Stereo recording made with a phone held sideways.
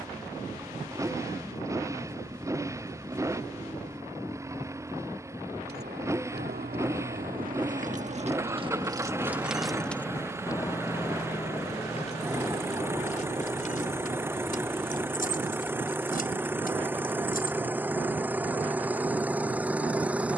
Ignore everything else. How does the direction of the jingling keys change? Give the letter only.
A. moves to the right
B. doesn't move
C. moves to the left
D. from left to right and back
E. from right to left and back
C.